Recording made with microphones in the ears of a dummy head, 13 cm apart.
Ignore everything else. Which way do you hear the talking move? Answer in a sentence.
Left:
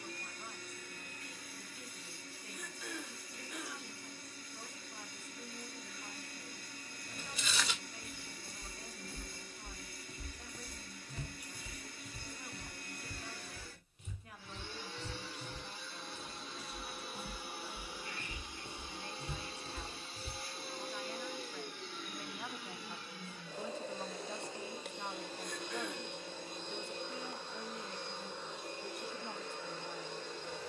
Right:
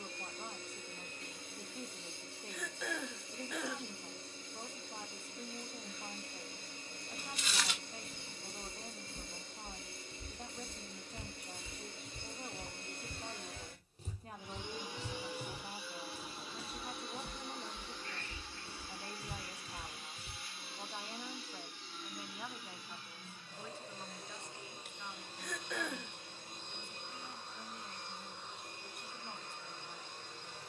You can hear the talking move from right to left.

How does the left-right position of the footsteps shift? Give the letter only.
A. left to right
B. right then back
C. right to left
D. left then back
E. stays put
B.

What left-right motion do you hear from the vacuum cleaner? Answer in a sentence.
In this clip you hear the vacuum cleaner move from right to left.